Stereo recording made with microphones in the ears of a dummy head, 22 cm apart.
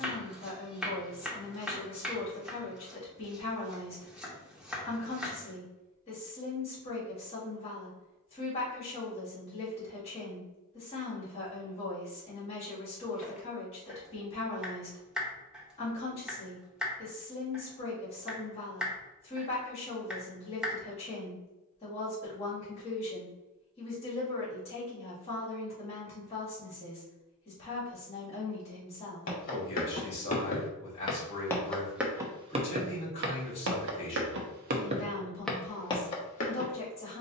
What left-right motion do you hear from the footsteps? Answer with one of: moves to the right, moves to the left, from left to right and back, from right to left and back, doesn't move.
from left to right and back.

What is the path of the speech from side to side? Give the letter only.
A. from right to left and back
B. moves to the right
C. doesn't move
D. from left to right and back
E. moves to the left
C.